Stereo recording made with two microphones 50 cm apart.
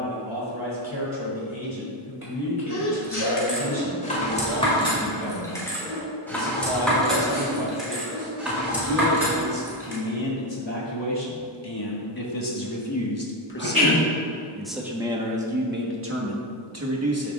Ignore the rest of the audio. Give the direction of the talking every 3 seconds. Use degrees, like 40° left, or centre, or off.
80° left, 80° left, 70° left, 60° left, 20° left, 20° right.